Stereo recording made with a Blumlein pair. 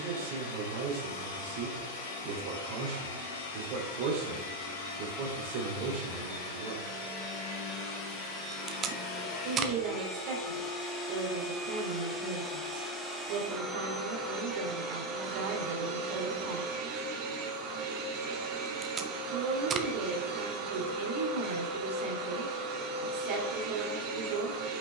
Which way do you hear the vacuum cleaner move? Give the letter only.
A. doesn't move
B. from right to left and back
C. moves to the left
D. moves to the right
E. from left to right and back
D.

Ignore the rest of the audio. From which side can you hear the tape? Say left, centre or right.
right.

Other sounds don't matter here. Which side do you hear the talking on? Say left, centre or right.
right.